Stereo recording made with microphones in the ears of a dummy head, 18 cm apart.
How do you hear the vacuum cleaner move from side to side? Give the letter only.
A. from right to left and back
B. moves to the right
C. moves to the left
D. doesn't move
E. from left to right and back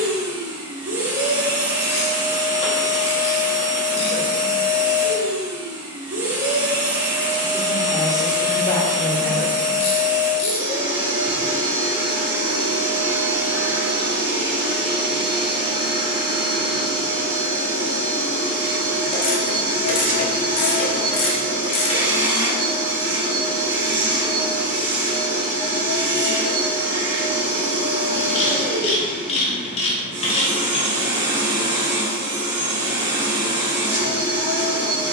D.